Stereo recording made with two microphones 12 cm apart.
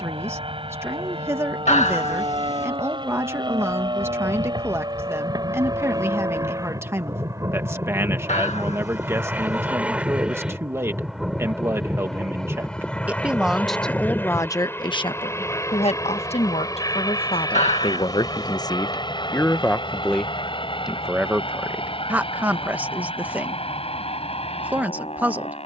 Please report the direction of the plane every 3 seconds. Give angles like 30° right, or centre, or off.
50° right, 40° right, 20° right, 10° right, 10° left, 30° left, 40° left, 50° left, 50° left.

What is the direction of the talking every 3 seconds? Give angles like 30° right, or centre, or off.
20° right, 20° right, 20° right, 20° right, centre, 60° left, 20° left, 10° right, 20° right.